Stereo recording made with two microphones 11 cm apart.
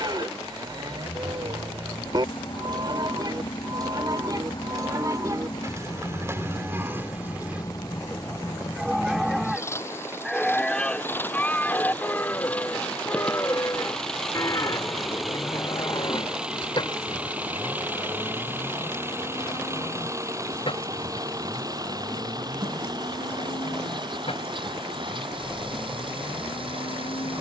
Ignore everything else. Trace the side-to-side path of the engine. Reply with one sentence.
In this clip you hear the engine go from the left side to the right.